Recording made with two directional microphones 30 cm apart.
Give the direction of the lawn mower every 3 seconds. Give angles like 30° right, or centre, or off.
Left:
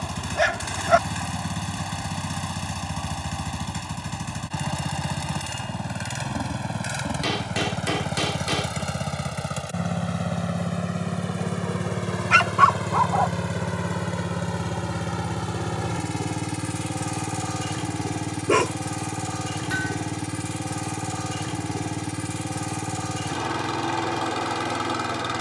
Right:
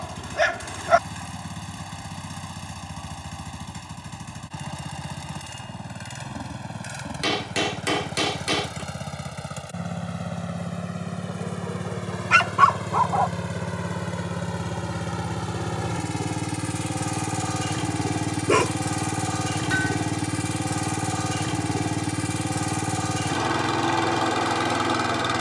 50° left, 40° left, 40° left, 30° left, 20° left, centre, 20° right, 20° right, 20° right.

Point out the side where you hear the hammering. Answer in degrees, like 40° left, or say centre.
20° right.